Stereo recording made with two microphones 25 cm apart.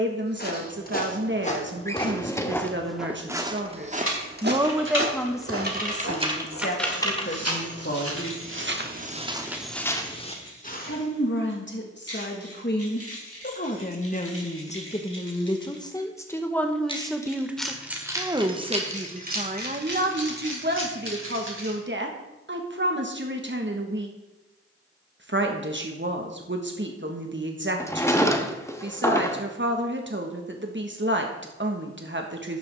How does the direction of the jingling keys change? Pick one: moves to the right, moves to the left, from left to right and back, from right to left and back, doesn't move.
from right to left and back.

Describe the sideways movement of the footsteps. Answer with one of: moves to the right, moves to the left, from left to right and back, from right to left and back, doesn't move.
from left to right and back.